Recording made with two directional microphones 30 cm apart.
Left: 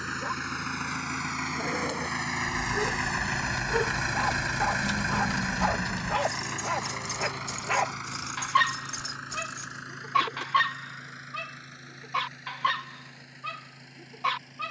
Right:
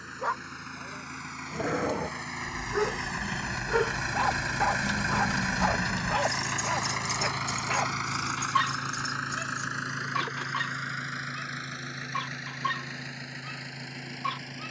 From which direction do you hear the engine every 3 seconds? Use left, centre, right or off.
left, centre, right, right, right.